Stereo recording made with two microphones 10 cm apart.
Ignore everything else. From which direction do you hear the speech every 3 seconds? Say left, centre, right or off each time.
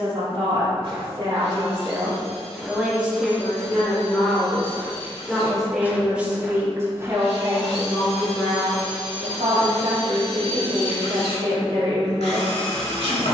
right, centre, right, right, right.